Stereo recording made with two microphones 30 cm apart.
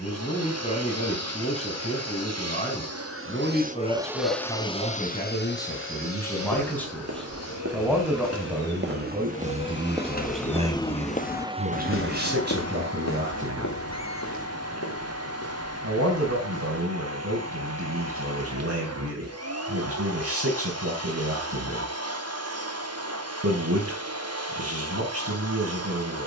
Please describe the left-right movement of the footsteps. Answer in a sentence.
You can hear the footsteps travel towards the left.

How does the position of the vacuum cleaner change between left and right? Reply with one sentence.
In this clip you hear the vacuum cleaner go left and come back.